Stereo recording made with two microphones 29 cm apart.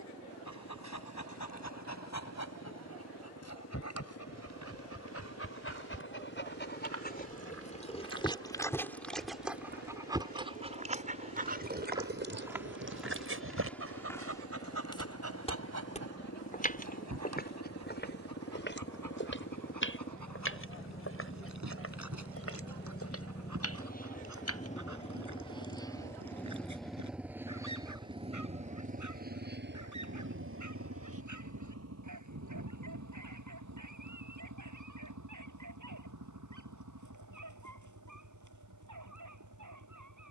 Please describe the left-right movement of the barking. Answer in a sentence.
In this clip you hear the barking move from left to right.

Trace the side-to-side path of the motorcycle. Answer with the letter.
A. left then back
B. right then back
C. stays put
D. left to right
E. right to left
D.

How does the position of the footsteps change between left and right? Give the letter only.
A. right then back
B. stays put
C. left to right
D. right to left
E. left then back
D.